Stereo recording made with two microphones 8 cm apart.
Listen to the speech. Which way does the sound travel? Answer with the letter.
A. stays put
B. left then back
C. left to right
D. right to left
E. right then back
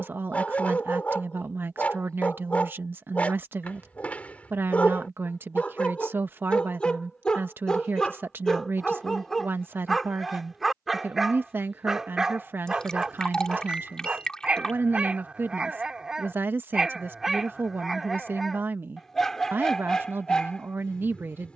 A.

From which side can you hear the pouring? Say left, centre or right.
centre.